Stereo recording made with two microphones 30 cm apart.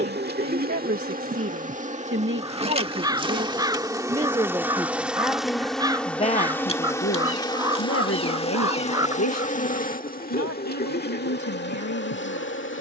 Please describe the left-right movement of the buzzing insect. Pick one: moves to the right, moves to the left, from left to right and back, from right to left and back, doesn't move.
moves to the left.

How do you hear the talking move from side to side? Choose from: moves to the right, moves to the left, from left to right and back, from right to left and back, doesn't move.
moves to the left.